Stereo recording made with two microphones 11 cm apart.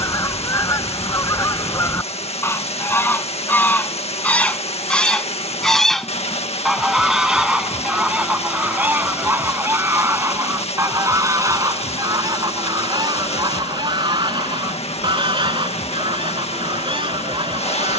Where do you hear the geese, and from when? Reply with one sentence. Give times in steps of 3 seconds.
You can hear the geese on the left from 0 s, in the centre from 3 s and on the right from 9 s.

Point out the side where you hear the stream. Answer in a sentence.
You can hear the stream on the left.